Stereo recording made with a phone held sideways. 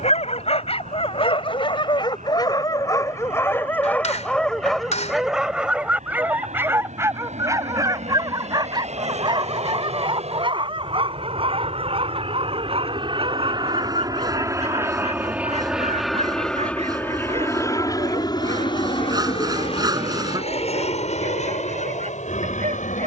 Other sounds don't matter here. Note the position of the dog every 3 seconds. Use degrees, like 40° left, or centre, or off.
40° left, 10° left, 20° right, 40° right, 50° right, 50° right, 60° right, 60° right.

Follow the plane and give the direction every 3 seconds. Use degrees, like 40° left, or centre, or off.
80° right, 70° right, 70° right, 60° right, 30° right, 10° left, 40° left, 60° left.